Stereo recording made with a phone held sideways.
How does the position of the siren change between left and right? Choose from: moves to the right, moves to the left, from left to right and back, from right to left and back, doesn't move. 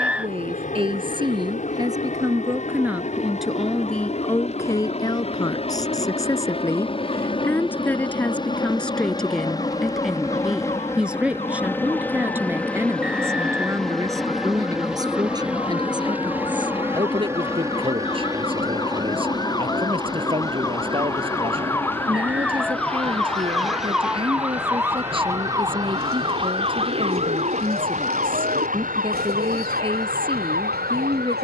moves to the right.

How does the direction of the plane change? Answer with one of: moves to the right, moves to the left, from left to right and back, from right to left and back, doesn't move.
moves to the right.